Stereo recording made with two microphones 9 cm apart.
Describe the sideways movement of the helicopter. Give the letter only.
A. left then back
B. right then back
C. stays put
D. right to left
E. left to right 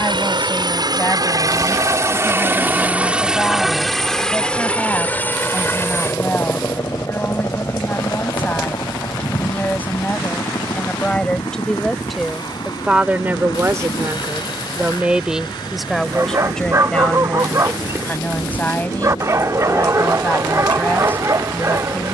D.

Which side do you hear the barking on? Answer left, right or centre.
right.